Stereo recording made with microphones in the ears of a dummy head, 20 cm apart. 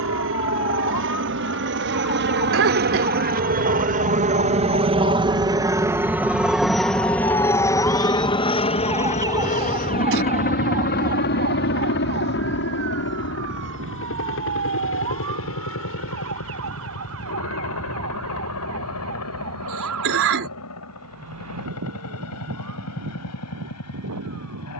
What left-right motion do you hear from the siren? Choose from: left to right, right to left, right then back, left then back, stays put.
left to right.